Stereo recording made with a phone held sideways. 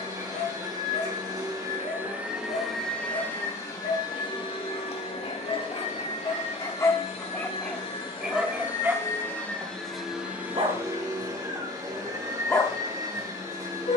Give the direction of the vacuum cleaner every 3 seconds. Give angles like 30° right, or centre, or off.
20° right, 40° left, 40° left, 10° right, 20° right.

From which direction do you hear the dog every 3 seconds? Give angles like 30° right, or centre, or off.
50° left, 50° left, 10° left, 30° right, 40° left.